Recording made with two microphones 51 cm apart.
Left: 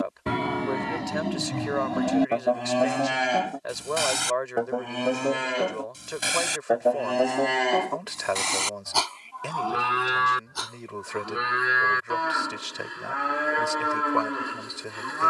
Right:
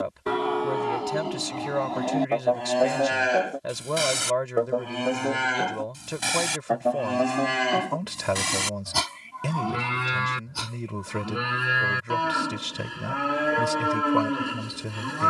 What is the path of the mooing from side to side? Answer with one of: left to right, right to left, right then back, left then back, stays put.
left to right.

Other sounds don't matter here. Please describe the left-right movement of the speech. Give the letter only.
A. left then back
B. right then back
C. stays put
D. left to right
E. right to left
C.